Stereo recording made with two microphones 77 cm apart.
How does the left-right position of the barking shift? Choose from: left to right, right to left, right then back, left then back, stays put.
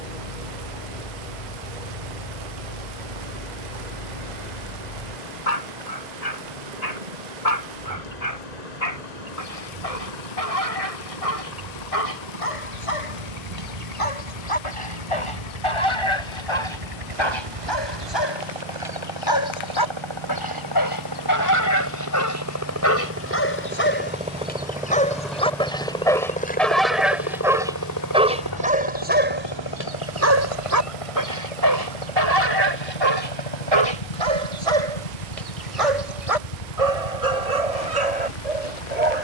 left to right.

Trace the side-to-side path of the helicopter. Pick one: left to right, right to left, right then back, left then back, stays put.
right to left.